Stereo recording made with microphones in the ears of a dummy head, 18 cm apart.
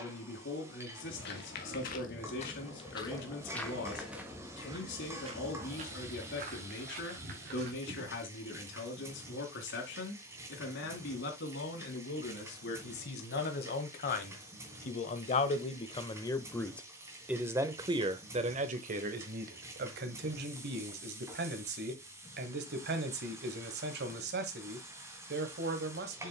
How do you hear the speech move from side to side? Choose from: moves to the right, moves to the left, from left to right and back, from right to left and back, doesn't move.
moves to the right.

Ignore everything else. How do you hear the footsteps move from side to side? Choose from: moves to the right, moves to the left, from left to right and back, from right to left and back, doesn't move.
moves to the right.